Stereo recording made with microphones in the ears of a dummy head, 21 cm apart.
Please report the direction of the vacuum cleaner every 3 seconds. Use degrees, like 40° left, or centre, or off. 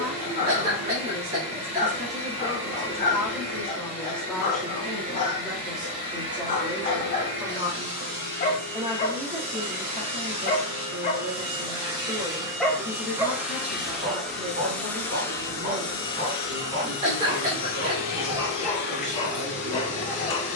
50° right, 50° right, 40° right, 30° right, 10° right, 30° left, 50° left.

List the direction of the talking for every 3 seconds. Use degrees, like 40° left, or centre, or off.
40° right, centre, 10° right, 40° right, 50° right, 60° right, 60° right.